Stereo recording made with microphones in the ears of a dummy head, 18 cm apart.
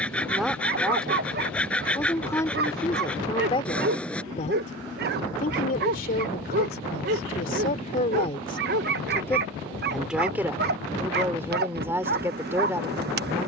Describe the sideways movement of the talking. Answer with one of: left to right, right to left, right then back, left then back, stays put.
left then back.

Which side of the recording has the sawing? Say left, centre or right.
centre.